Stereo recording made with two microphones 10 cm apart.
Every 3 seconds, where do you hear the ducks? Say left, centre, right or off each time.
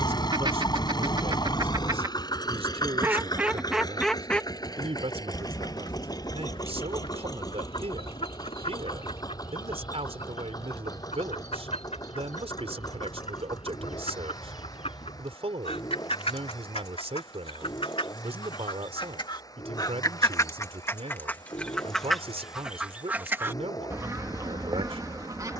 right, centre, left, left, left, left, left, centre, right.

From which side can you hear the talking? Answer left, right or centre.
right.